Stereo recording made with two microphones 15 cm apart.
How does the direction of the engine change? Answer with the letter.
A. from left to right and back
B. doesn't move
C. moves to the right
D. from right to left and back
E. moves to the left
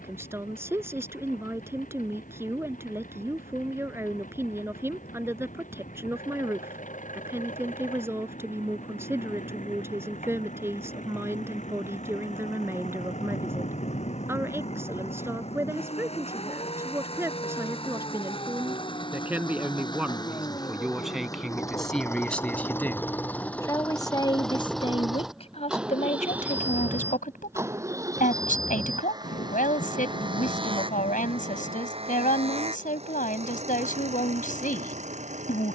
C.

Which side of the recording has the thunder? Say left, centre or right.
left.